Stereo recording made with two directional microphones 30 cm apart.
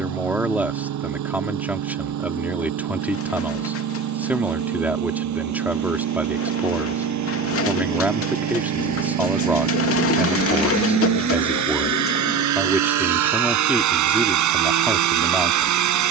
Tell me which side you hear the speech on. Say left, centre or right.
centre.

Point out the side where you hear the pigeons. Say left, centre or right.
left.